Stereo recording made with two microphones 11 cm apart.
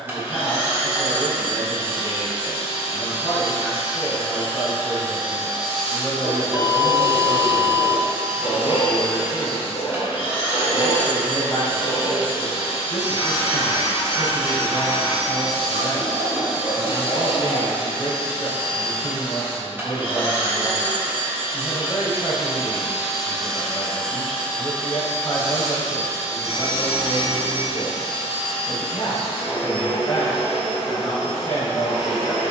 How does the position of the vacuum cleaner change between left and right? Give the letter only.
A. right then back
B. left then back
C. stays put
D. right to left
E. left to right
D.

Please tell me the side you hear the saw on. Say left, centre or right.
left.